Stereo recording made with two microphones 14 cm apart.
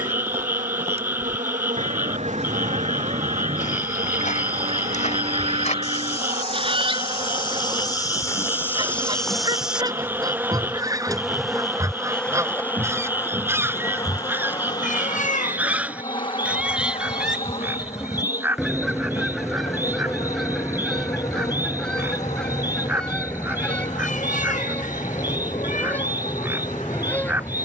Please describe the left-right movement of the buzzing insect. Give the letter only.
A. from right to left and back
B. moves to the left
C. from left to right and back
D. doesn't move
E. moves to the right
B.